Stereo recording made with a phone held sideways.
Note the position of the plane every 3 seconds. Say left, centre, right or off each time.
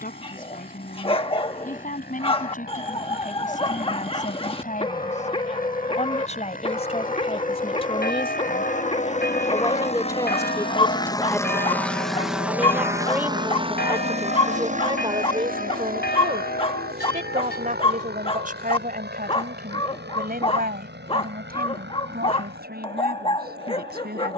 left, left, left, left, right, right, right, right.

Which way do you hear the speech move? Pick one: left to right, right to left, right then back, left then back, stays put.
left to right.